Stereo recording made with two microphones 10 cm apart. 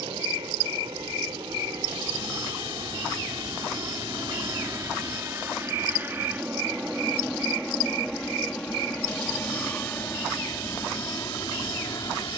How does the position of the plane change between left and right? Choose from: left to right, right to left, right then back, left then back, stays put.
right to left.